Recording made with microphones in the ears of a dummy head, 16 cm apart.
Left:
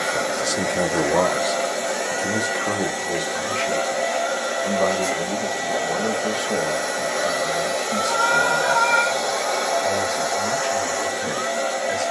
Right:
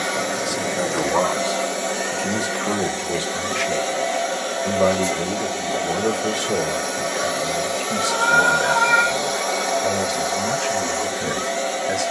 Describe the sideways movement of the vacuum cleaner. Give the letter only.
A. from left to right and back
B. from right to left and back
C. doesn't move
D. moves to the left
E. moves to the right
C.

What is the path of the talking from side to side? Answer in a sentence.
You can hear the talking move to the right.